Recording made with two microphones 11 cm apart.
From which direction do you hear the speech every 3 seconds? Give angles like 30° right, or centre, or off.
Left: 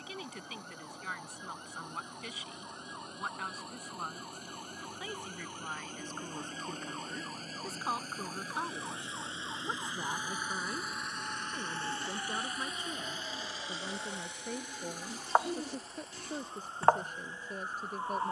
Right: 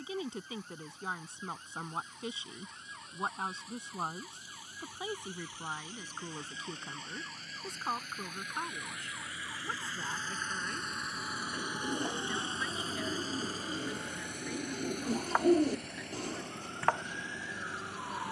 30° right, 20° right, centre, 20° left, 40° left, 40° left.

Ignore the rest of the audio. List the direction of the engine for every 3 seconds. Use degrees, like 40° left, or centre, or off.
60° left, 60° left, 40° left, 10° left, 40° right, 70° right.